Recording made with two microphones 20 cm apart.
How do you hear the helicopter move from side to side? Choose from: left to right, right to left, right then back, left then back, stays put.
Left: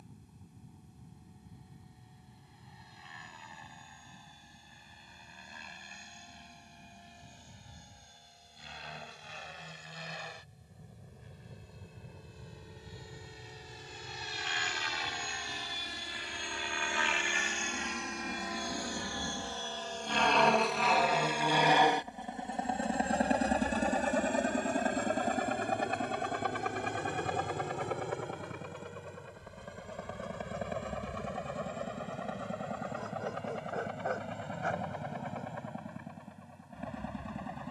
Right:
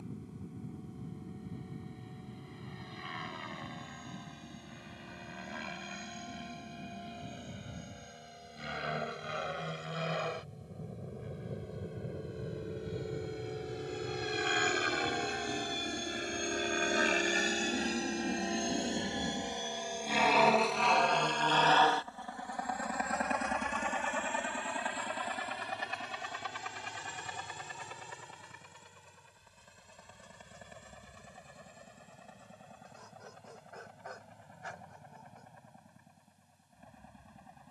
right to left.